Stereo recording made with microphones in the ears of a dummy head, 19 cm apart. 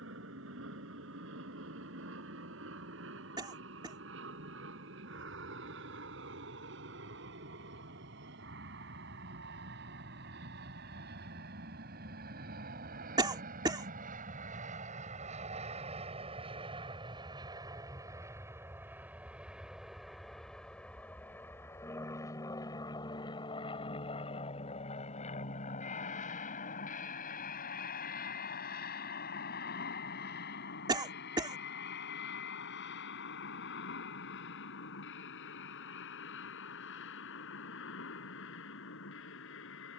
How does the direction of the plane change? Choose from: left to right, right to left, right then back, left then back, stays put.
right to left.